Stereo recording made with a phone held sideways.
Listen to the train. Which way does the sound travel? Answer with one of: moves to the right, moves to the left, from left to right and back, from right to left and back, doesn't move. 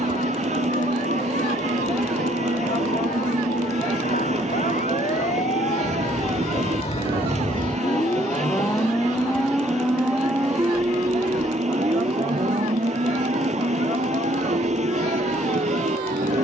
doesn't move.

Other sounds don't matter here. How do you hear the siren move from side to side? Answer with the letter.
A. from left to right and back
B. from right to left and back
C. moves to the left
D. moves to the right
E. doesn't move
D.